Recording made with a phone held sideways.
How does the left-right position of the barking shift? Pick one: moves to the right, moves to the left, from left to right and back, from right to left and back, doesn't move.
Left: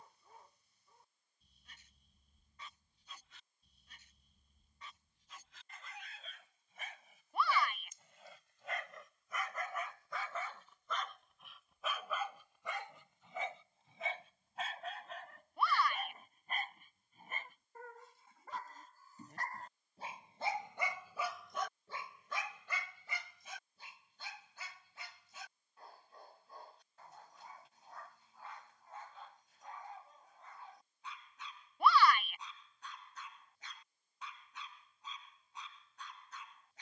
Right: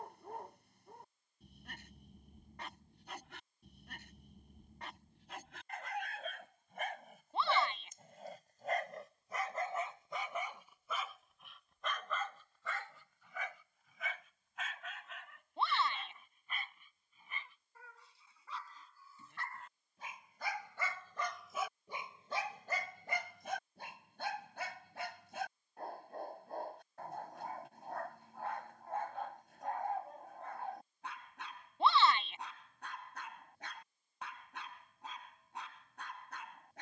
from right to left and back.